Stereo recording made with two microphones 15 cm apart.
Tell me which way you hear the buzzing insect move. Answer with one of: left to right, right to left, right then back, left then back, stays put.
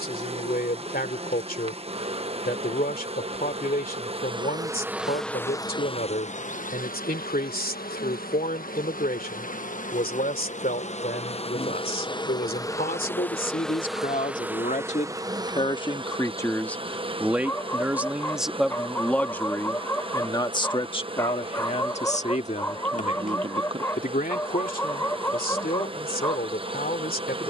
left then back.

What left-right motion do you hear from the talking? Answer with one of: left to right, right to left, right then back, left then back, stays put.
right then back.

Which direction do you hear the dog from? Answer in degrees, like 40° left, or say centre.
20° left.